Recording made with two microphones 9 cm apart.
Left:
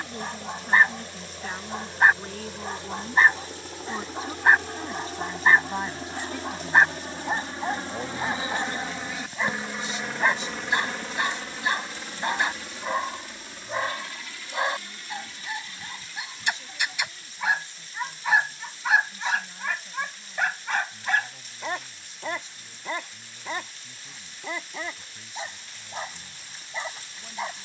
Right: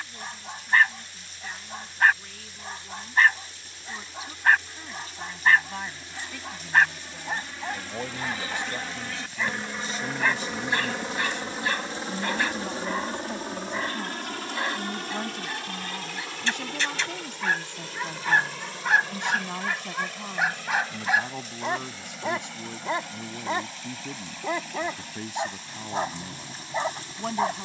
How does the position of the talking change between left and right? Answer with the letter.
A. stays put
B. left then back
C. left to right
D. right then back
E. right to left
C.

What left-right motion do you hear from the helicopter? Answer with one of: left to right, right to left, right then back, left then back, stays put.
left to right.